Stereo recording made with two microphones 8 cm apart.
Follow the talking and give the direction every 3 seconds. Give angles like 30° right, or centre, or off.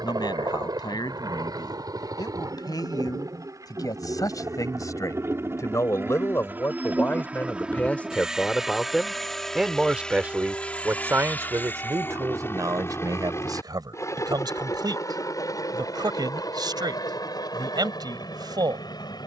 60° left, 50° left, 20° left, 20° right, 50° right, 60° right, 60° right.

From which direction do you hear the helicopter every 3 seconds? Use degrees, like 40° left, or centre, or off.
60° right, 40° right, 10° right, 10° left, 30° left, 50° left, 50° left.